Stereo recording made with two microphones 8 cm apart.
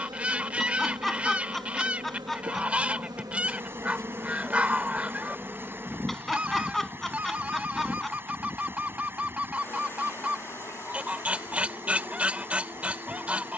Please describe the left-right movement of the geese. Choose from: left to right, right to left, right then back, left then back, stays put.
stays put.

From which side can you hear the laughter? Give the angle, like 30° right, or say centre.
centre.